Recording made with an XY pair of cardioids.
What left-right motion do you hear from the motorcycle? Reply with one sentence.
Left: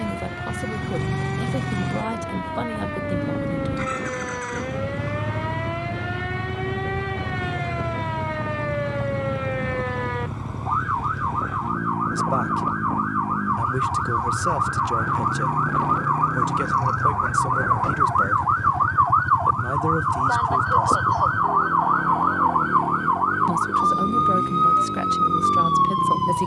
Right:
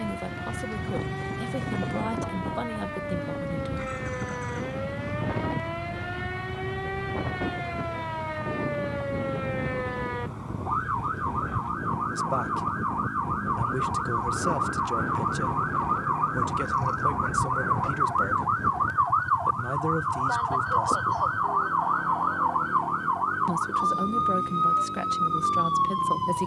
You can hear the motorcycle stay put.